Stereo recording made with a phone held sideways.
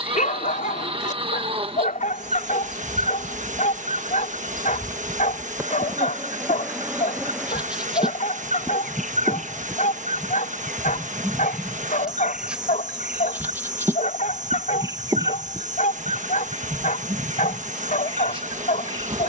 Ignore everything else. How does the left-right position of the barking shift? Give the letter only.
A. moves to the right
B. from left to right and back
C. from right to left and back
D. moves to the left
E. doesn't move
E.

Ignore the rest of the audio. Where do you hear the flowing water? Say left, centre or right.
right.